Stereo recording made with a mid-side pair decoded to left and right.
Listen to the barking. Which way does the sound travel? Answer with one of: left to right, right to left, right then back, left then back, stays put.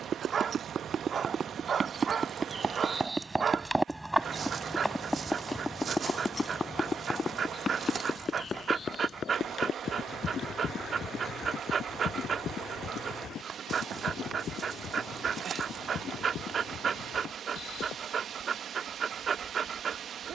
stays put.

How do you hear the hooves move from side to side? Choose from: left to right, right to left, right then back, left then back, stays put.
right to left.